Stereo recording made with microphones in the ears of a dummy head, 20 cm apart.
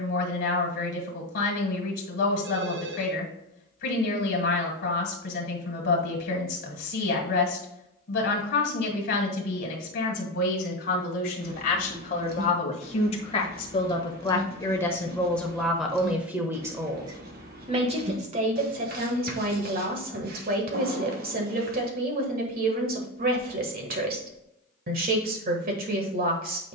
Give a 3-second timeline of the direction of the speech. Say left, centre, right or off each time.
left, left, left, left, left, centre, right, right, right.